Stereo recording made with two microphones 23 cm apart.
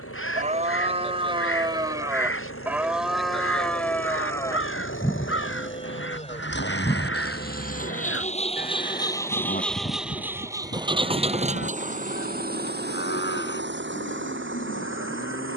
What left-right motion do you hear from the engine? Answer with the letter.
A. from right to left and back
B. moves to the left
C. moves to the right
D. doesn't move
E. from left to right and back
C.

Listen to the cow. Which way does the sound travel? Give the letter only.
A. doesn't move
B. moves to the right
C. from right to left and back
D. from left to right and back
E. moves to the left
E.